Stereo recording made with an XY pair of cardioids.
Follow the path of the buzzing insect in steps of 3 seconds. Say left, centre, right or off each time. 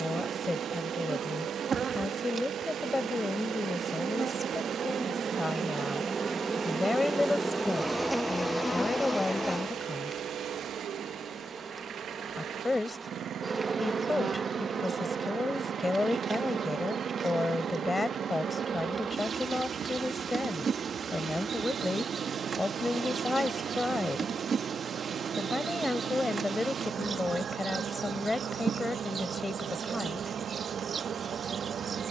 right, right, centre, centre, right, right, right, right, right, right, right.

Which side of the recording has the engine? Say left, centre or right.
right.